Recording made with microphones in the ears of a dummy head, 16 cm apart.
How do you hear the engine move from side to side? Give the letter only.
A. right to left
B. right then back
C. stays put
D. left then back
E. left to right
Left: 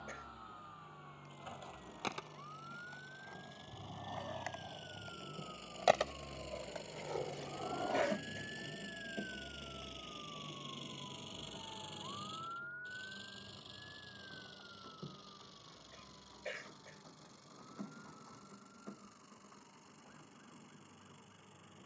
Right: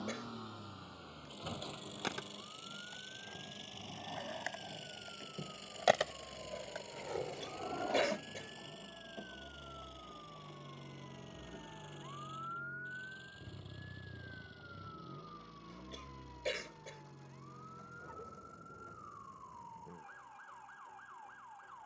A.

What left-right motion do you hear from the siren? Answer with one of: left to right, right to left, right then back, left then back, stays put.
left to right.